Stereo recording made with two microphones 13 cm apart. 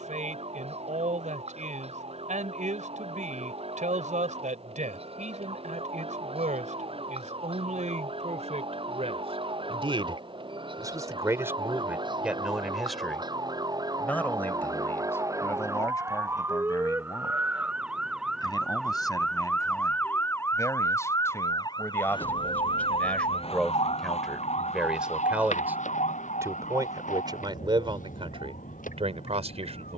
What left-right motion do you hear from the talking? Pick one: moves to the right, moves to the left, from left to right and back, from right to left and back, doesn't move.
from right to left and back.